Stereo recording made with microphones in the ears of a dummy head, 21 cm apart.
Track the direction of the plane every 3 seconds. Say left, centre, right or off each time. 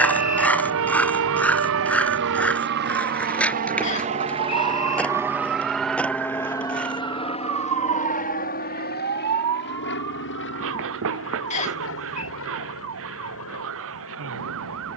right, right, left, left, left.